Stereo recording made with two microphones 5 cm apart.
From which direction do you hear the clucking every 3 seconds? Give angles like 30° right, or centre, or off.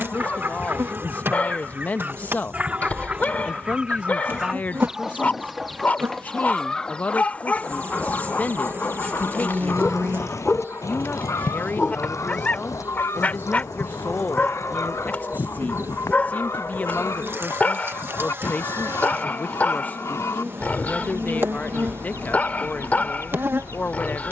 30° right, 10° right, 30° left, 60° left, 80° left, 80° left, 80° left, 80° left.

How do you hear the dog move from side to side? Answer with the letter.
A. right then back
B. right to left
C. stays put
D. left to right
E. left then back
C.